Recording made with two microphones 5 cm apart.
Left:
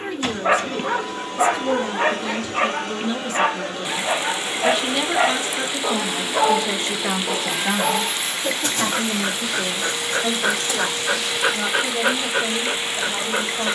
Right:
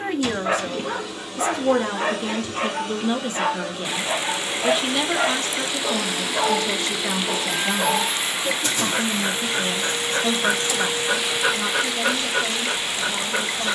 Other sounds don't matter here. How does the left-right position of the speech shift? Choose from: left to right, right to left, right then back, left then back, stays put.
right to left.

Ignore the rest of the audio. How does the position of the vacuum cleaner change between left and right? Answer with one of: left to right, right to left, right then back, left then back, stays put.
right then back.